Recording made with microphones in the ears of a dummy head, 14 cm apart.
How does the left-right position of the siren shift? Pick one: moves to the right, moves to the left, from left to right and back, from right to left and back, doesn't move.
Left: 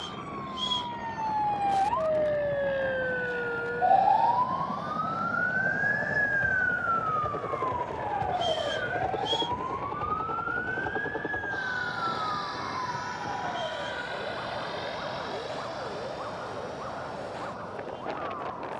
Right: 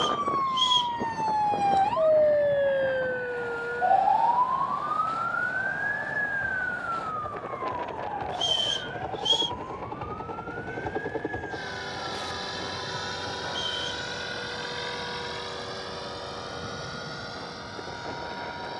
moves to the left.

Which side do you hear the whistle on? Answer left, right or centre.
right.